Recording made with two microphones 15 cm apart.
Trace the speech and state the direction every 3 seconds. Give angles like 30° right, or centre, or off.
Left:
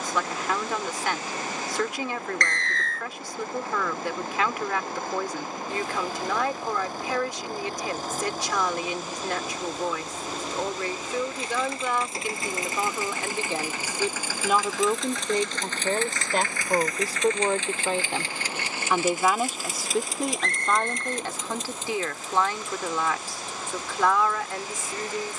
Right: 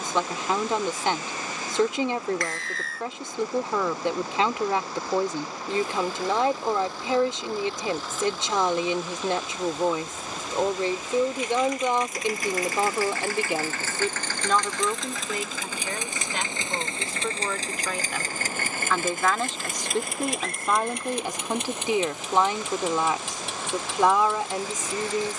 30° right, 30° right, 30° right, 30° right, 10° right, 40° left, 10° left, 20° right, 20° right.